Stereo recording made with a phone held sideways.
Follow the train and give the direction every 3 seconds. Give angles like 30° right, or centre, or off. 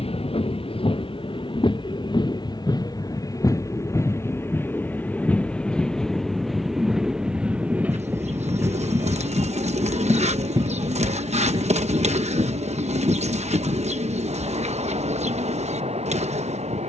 40° left, 20° left, 10° right, 30° right, 40° right, 50° right.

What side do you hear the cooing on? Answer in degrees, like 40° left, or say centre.
50° right.